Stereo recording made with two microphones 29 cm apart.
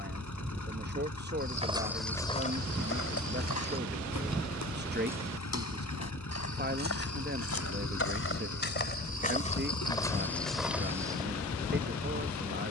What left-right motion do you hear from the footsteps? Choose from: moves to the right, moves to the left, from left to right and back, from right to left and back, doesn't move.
from right to left and back.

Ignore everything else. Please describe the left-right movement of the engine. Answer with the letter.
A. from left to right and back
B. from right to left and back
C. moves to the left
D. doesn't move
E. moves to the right
D.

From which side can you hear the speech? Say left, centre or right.
right.